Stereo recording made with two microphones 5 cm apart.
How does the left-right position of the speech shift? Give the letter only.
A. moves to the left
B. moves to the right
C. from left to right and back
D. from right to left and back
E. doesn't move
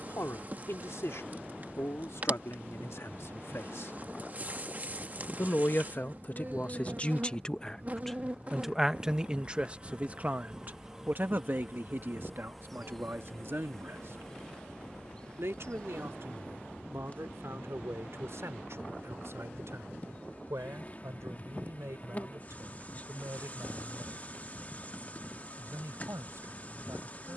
B.